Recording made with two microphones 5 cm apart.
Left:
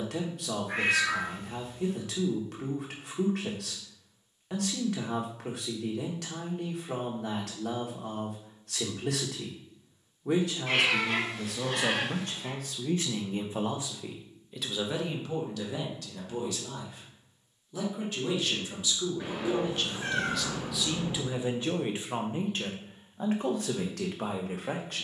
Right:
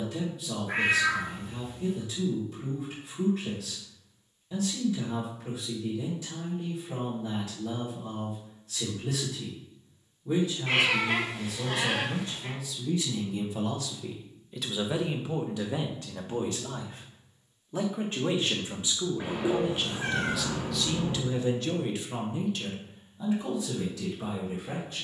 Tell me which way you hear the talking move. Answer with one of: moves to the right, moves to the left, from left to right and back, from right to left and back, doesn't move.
from left to right and back.